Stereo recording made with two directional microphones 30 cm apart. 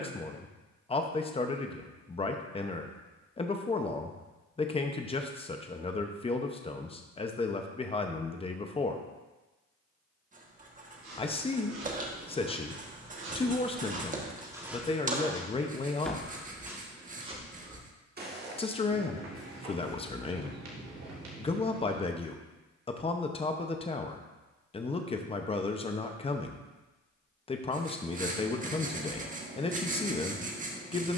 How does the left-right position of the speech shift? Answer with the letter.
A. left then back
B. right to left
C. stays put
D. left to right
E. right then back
C.